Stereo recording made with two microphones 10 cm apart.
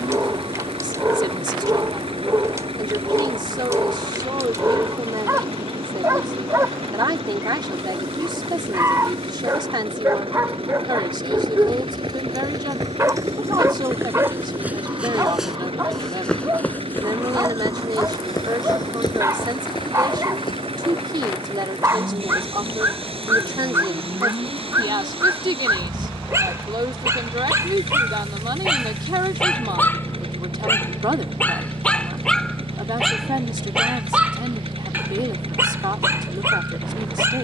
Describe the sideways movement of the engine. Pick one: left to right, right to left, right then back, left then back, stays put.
stays put.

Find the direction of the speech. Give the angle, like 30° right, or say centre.
50° right.